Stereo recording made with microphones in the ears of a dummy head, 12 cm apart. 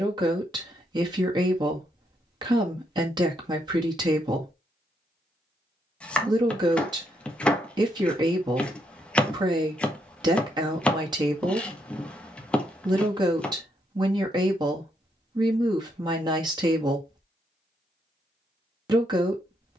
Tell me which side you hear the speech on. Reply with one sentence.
In this clip you hear the speech on the right.